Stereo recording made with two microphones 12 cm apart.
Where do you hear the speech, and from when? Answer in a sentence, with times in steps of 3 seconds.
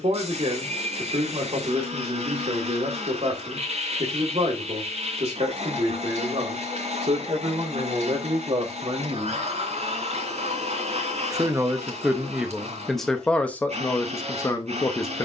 In this clip you hear the speech on the right from 0 s and in the centre from 12 s.